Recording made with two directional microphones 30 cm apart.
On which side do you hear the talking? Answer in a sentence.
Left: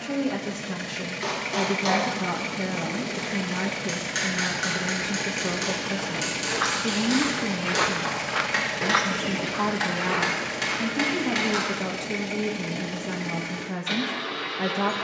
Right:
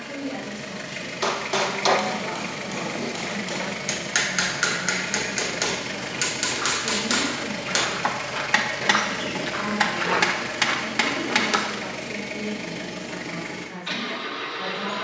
You can hear the talking on the left.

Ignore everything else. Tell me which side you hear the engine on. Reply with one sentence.
You can hear the engine in the centre.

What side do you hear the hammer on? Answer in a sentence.
You can hear the hammer on the right.